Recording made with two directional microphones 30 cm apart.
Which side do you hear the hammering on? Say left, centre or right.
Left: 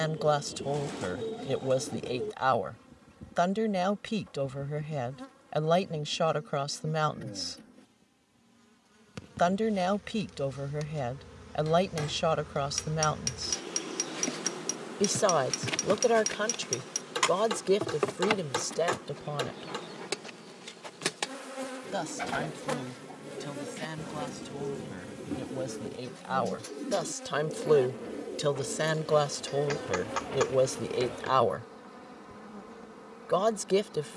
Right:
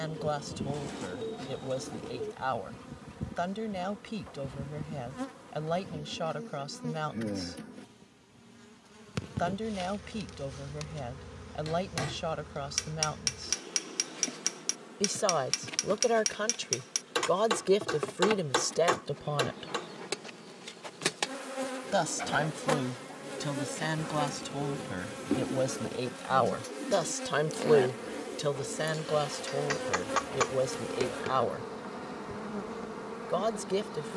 right.